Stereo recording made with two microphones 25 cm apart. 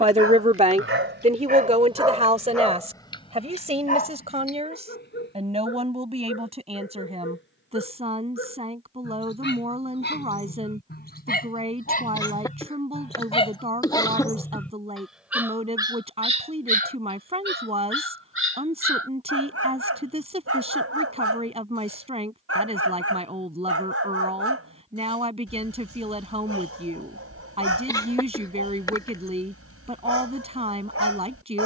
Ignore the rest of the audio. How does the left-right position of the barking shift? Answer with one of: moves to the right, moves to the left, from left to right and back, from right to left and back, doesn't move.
from right to left and back.